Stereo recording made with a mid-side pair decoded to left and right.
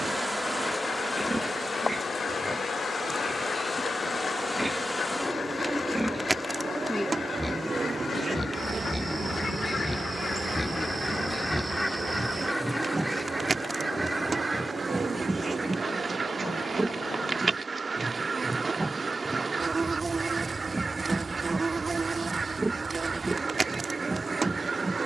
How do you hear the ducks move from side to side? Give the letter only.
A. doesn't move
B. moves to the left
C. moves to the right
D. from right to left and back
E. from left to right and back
C.